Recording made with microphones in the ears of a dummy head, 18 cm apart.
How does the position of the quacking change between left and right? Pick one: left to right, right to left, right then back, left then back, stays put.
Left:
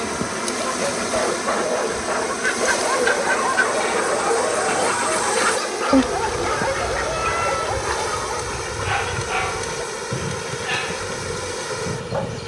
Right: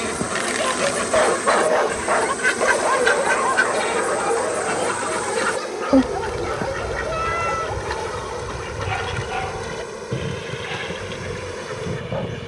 left then back.